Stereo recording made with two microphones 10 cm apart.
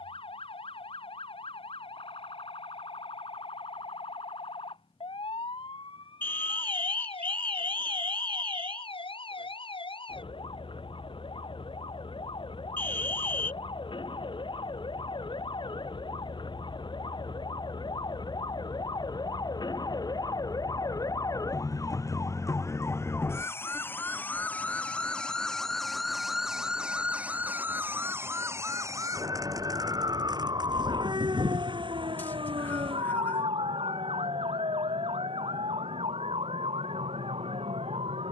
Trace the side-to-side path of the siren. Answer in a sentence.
You can hear the siren travel towards the right.